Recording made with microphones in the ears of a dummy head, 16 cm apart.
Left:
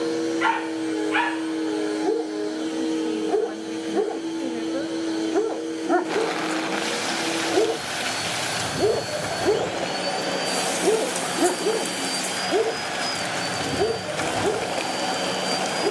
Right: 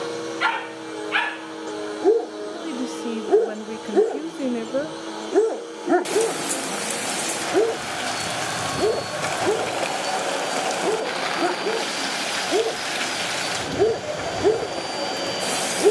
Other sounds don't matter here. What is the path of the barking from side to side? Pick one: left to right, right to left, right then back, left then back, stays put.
left then back.